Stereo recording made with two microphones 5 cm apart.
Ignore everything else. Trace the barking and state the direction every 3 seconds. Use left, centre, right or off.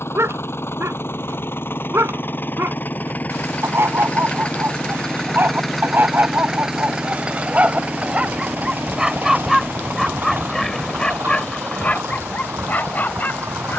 right, right, right, centre, left.